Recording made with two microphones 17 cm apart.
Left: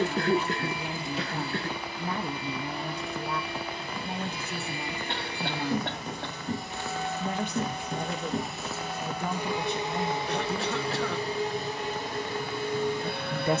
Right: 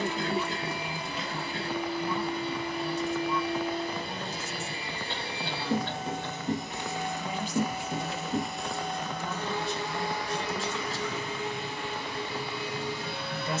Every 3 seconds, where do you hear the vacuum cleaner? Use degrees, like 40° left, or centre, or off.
50° right, 40° right, 10° right, 30° left, 50° left.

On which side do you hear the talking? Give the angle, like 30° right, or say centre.
60° left.